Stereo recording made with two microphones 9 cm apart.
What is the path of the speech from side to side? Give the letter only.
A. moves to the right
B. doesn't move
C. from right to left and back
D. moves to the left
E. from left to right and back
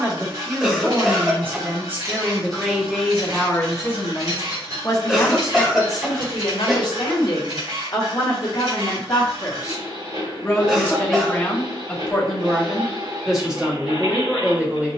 C.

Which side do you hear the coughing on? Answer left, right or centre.
centre.